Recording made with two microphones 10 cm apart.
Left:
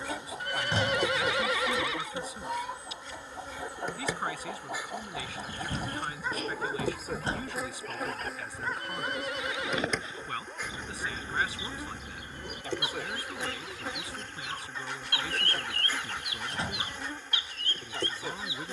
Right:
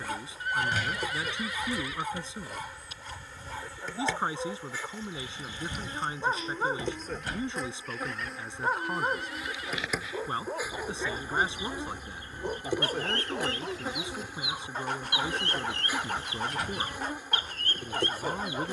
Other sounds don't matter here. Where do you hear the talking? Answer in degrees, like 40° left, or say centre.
20° right.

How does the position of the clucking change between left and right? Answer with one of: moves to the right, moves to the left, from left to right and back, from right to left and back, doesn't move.
moves to the right.